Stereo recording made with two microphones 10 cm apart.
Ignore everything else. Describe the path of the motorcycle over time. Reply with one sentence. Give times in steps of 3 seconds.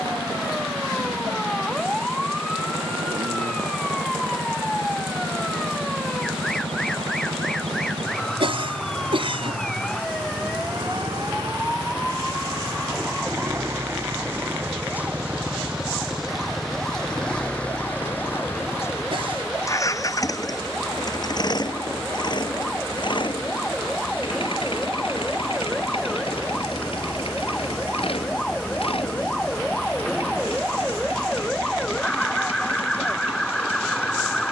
You can hear the motorcycle on the right from 0 s, in the centre from 15 s and on the left from 18 s.